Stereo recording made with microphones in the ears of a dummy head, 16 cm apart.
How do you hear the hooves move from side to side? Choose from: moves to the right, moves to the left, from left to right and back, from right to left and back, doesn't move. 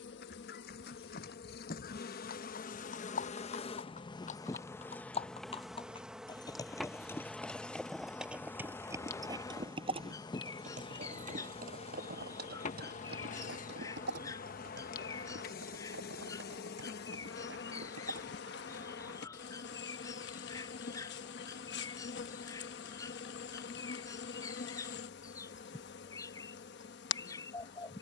moves to the right.